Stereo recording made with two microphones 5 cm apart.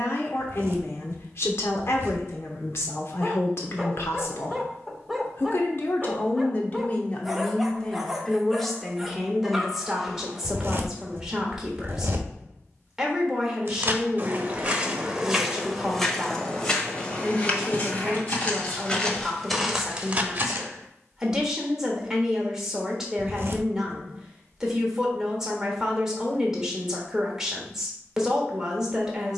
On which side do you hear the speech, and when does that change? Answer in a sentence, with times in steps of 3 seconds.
You can hear the speech on the left from 0 s and in the centre from 9 s.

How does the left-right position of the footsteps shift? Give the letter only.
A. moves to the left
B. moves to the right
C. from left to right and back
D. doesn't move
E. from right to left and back
E.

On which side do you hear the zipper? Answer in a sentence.
You can hear the zipper on the right.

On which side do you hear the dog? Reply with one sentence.
In this clip you hear the dog in the centre.